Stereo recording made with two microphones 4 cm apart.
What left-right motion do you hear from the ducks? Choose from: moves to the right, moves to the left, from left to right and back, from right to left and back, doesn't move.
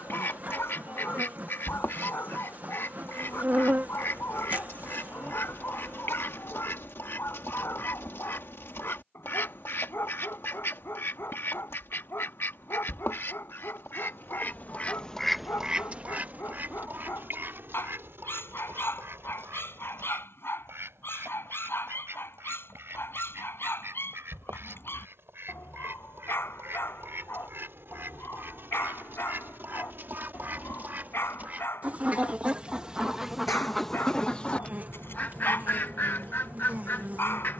from left to right and back.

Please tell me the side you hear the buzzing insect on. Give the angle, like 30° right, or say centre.
40° right.